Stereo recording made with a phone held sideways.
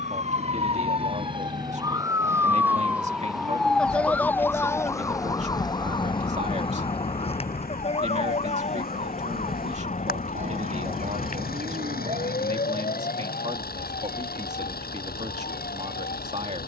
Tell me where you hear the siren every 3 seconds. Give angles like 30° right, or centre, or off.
30° right, 10° left, 40° left, 50° left, 60° left, 60° left.